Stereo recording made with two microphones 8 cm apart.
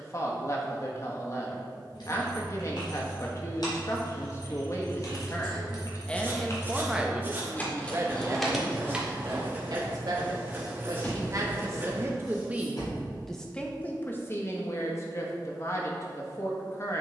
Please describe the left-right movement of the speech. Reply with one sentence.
You can hear the speech go right and come back.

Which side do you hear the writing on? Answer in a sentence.
You can hear the writing on the right.